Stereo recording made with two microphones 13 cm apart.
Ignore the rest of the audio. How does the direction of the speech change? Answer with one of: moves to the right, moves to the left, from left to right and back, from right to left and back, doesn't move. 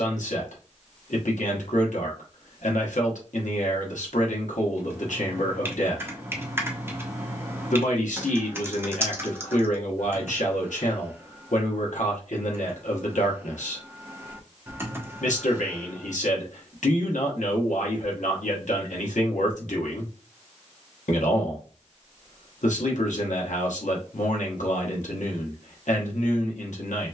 doesn't move.